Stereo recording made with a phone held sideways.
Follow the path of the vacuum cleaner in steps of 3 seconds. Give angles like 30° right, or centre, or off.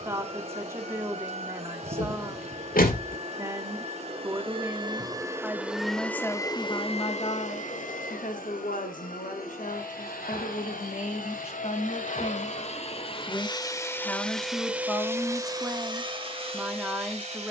50° right, 30° right, 50° left, 70° left, 30° left, 40° right.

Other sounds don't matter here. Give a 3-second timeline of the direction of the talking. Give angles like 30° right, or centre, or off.
20° right, 10° right, 40° left, 50° left, 20° left, 10° right.